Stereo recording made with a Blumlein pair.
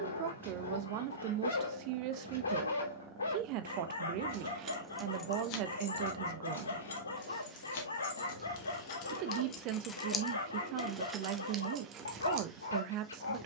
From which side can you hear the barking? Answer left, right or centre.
left.